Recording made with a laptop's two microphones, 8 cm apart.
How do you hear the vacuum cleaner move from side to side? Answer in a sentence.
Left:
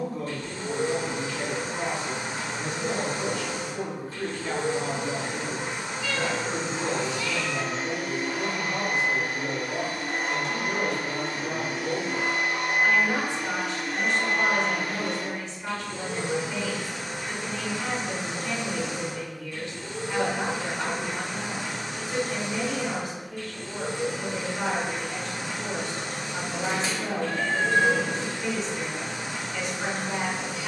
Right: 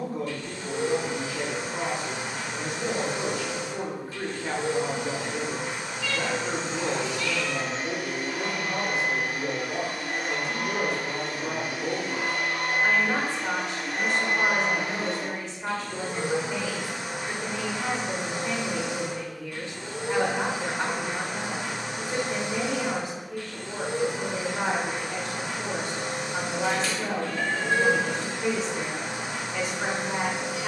You can hear the vacuum cleaner go from the left side to the right.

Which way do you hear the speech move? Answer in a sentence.
You can hear the speech stay put.